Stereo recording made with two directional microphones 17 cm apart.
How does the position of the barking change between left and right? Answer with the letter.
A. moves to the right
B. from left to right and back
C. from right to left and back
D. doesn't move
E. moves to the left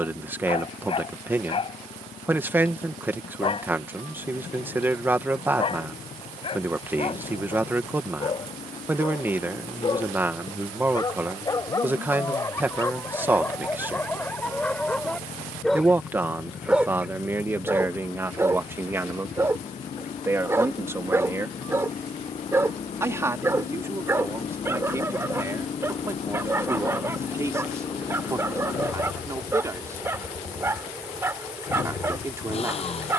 A.